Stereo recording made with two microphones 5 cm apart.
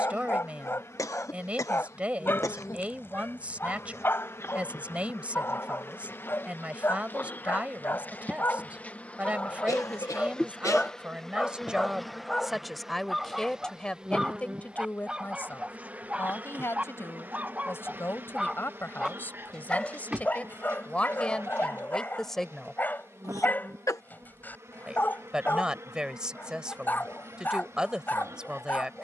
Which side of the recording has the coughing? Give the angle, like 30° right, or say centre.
80° left.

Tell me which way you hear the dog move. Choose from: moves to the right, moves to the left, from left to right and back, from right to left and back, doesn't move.
from left to right and back.